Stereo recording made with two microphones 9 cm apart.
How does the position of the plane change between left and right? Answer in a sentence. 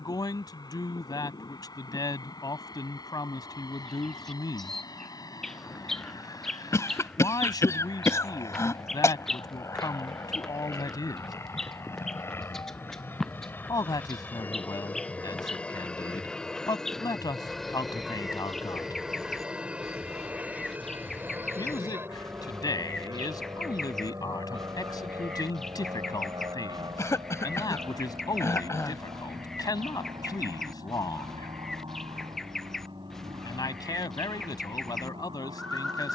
You can hear the plane move from left to right.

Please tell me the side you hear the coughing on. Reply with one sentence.
In this clip you hear the coughing on the left.